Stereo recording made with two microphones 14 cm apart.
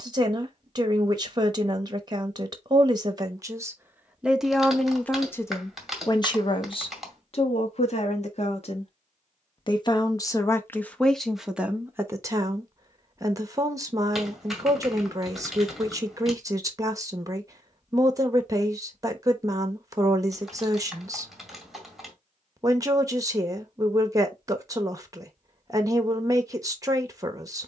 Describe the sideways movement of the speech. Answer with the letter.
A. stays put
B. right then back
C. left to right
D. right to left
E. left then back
E.